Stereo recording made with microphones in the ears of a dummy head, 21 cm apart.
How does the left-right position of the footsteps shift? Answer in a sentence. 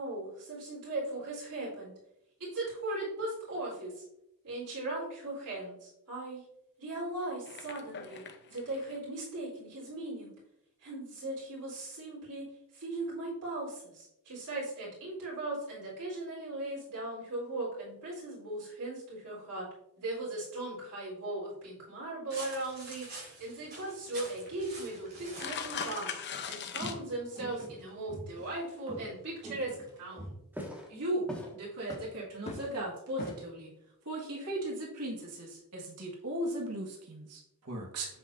You can hear the footsteps go from the right side to the left.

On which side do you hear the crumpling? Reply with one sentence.
You can hear the crumpling on the left.